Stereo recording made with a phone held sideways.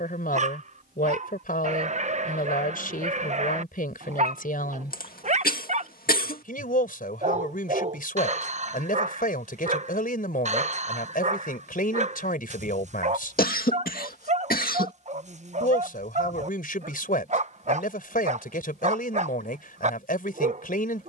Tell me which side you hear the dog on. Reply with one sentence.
You can hear the dog on the right.